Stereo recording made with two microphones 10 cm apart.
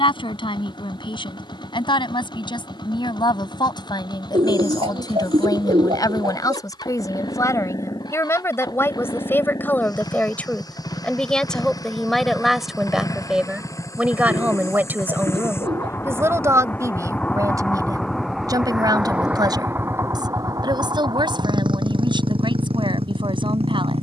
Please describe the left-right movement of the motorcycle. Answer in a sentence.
In this clip you hear the motorcycle move to the right.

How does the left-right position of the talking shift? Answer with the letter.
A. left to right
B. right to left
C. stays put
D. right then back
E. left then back
A.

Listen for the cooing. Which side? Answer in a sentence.
You can hear the cooing on the right.